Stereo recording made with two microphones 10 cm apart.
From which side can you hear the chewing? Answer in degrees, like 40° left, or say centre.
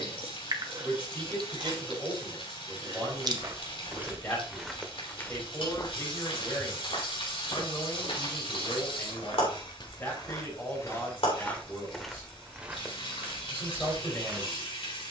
40° right.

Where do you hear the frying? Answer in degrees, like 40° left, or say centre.
70° left.